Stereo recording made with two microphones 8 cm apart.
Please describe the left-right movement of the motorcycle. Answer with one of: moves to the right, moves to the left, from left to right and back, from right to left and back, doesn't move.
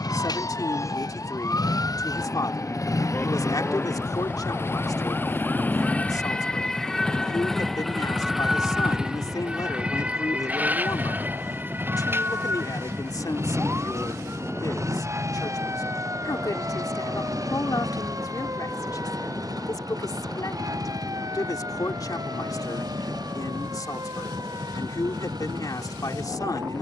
moves to the right.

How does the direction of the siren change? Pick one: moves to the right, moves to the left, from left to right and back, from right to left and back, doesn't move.
moves to the right.